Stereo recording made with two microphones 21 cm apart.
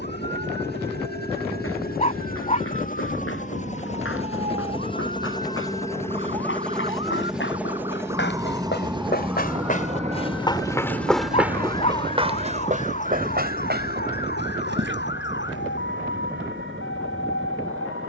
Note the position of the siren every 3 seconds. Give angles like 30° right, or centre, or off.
50° right, 40° right, 20° right, 10° left, 40° left, 60° left.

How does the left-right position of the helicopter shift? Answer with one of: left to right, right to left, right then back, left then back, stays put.
left to right.